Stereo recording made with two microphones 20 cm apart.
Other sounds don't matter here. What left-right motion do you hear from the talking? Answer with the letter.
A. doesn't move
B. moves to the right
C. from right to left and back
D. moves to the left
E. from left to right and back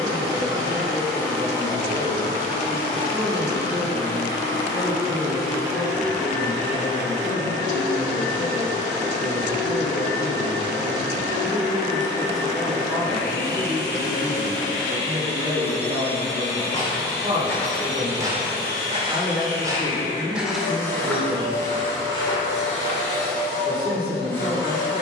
C.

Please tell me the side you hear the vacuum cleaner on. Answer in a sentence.
You can hear the vacuum cleaner on the left.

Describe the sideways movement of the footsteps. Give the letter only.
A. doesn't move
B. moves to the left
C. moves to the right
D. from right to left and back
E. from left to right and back
E.